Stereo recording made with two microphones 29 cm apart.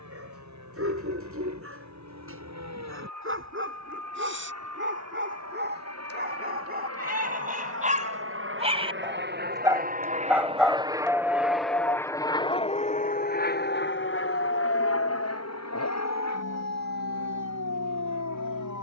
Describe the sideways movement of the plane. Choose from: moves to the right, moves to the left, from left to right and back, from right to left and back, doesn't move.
moves to the left.